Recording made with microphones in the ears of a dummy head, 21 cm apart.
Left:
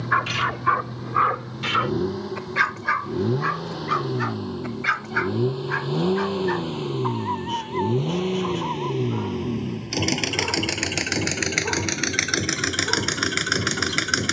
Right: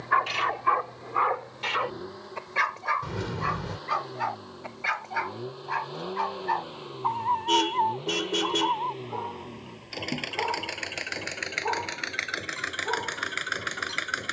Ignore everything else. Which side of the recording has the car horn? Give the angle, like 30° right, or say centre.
80° right.